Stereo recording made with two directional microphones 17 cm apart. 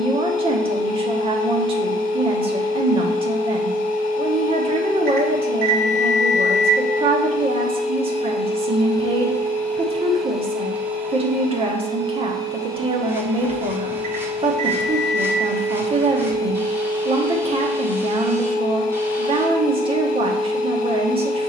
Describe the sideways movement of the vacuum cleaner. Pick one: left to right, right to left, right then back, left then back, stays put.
right then back.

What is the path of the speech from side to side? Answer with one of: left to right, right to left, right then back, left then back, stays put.
stays put.